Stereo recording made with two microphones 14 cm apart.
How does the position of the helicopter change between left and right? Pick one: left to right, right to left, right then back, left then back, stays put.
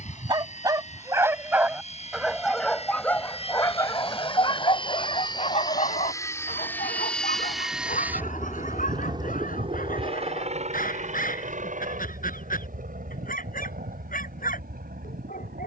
left to right.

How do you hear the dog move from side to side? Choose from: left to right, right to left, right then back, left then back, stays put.
right to left.